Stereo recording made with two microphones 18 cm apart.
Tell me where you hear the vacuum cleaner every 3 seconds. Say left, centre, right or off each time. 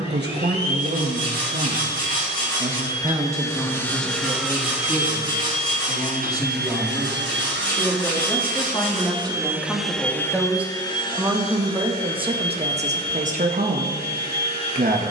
left, centre, right, centre, left.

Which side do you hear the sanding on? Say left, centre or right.
right.